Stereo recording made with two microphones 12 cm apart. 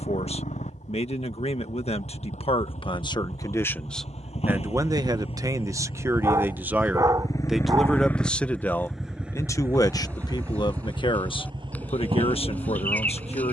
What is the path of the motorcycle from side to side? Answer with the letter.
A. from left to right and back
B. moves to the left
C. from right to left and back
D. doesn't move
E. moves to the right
E.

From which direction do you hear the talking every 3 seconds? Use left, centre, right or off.
left, centre, centre, left, left.